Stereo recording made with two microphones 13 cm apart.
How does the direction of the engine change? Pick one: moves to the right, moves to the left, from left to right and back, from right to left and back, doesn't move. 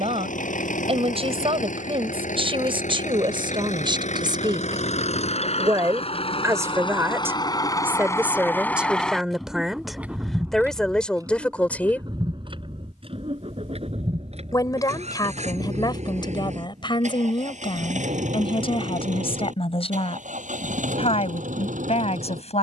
moves to the right.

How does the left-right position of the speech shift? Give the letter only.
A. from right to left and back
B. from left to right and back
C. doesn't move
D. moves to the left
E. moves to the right
D.